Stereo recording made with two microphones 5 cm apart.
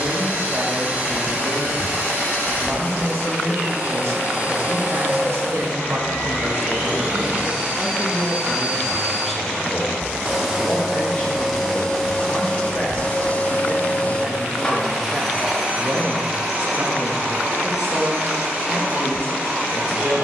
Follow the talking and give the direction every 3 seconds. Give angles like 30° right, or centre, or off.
70° right, 60° right, 20° right, 20° left, 10° left, 40° right, 60° right.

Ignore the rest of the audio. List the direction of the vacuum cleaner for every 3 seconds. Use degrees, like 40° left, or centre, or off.
30° right, 30° right, 20° right, centre, 20° left, 20° right, 30° right.